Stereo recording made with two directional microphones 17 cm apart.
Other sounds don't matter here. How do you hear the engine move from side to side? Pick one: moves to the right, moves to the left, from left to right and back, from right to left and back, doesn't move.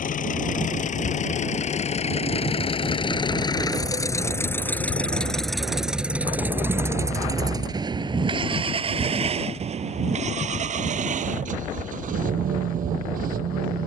moves to the right.